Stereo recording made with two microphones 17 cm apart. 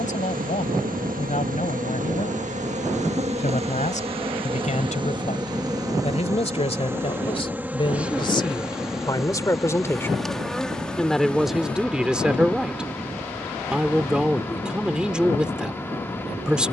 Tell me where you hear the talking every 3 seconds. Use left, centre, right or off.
left, left, left, centre, centre, centre.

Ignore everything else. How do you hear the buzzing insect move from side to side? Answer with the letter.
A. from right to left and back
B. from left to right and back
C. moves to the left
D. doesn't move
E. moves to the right
C.